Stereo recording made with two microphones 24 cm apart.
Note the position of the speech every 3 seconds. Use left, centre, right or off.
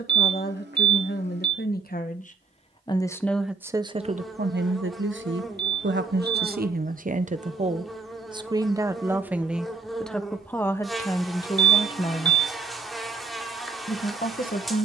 left, right, right, centre, left.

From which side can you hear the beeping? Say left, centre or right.
right.